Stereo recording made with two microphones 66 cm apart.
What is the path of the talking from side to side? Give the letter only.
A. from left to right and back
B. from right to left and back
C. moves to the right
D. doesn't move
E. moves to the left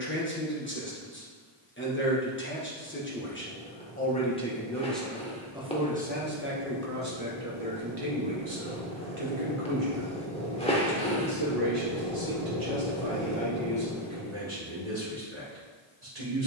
C.